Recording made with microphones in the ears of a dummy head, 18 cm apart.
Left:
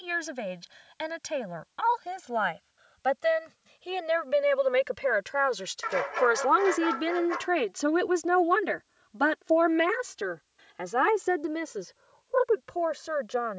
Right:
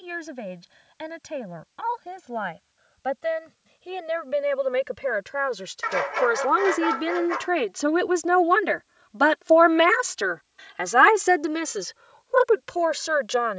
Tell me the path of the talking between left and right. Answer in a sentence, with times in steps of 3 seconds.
You can hear the talking on the left from 0 s, in the centre from 6 s and on the right from 9 s.